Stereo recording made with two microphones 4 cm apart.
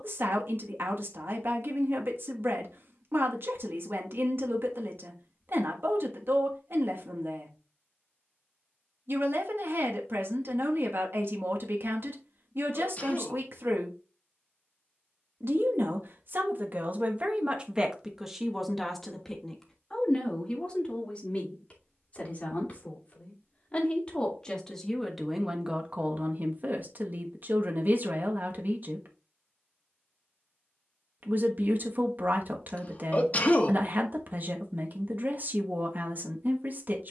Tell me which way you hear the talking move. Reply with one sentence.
In this clip you hear the talking move from right to left and back again.